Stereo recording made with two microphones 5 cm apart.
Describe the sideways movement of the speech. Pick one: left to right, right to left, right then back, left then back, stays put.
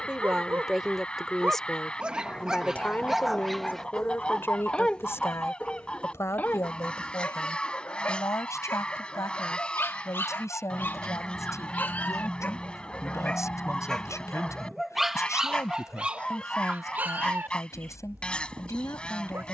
right to left.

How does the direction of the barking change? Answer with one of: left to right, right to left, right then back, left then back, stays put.
left then back.